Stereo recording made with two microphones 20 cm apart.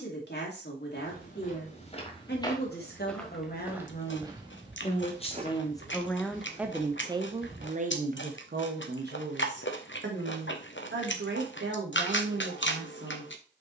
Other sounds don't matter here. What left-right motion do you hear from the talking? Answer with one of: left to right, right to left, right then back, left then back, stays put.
left to right.